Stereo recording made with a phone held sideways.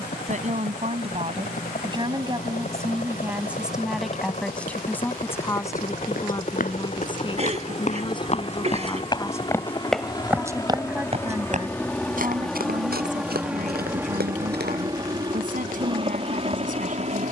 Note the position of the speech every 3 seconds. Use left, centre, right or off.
right, centre, left, centre, right, right.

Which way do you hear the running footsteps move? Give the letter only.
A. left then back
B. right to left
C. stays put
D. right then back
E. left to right
E.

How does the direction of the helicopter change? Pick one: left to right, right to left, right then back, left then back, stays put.
left to right.